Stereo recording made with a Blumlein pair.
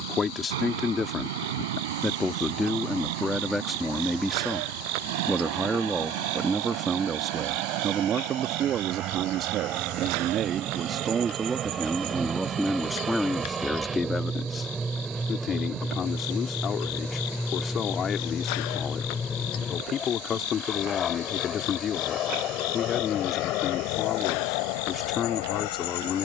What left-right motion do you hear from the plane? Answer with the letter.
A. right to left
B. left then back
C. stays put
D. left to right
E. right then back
A.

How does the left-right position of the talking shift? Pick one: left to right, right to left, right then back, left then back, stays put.
right then back.